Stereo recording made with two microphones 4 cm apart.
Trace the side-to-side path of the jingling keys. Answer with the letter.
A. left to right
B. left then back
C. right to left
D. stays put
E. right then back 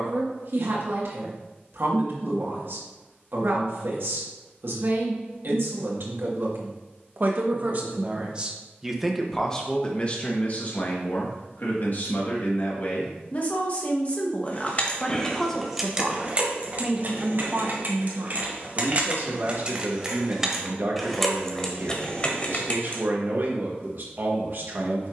E.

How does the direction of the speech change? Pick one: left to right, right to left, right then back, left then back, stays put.
left then back.